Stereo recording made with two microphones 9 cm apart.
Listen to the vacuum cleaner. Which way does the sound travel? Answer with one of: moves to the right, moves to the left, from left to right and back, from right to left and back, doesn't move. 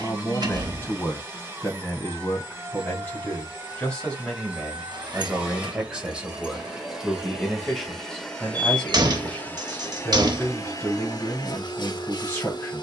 moves to the left.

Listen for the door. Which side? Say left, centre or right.
right.